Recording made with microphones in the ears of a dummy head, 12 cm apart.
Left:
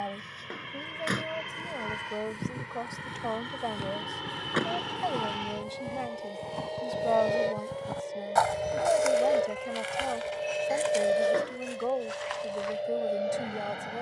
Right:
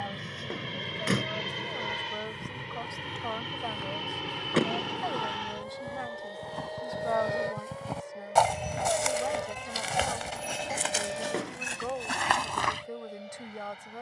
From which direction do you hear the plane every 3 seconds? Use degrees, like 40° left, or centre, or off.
30° right, 10° right, 20° left, 40° left, 50° left.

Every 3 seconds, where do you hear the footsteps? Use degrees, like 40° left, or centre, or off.
30° left, 20° left, centre, 50° right, 70° right.